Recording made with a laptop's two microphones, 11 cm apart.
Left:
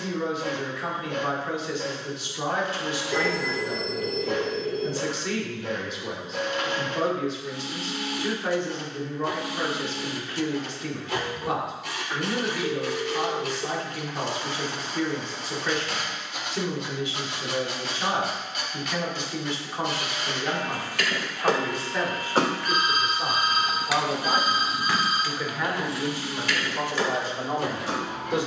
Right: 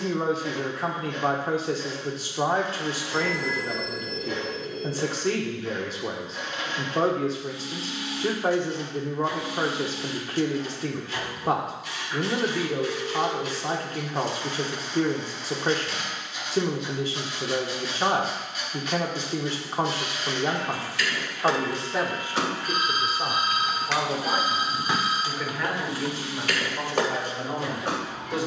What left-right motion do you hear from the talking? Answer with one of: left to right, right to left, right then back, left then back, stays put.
right to left.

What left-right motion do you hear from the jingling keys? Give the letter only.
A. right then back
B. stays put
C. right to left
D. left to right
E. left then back
D.